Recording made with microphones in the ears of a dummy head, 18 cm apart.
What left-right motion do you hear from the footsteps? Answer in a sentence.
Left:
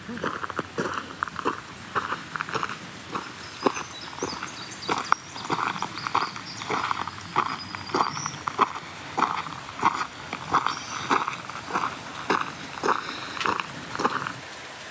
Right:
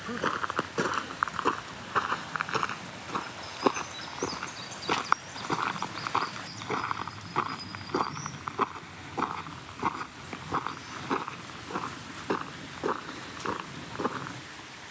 You can hear the footsteps go from the right side to the left.